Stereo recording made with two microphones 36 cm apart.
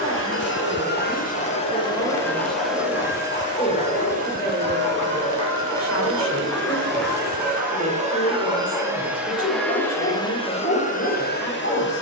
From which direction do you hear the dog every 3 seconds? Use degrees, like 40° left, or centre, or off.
30° left, 20° left, centre, 30° left.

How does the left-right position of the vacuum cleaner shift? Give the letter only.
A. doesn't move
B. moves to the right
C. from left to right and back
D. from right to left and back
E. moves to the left
C.